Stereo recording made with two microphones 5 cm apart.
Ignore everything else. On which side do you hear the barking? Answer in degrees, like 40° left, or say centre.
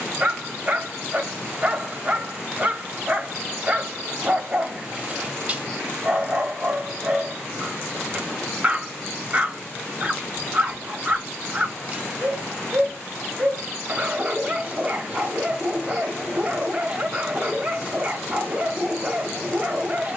20° right.